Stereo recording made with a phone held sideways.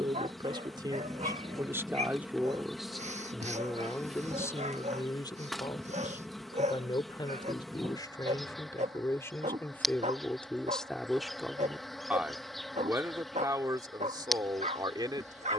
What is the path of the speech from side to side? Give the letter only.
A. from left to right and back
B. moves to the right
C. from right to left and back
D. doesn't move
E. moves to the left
C.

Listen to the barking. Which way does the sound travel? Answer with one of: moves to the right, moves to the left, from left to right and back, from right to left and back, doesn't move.
doesn't move.